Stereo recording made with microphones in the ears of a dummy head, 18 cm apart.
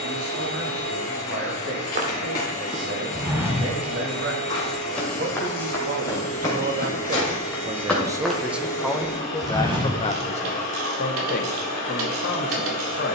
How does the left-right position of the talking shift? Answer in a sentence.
In this clip you hear the talking travel towards the left.